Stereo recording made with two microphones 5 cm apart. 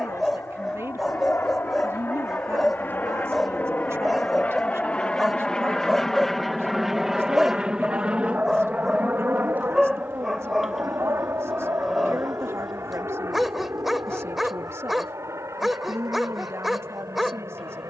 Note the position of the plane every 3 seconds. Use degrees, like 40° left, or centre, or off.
50° left, 30° left, 10° right, 50° right, 60° right, 70° right.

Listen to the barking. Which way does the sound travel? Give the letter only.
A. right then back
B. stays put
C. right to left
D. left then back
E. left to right
B.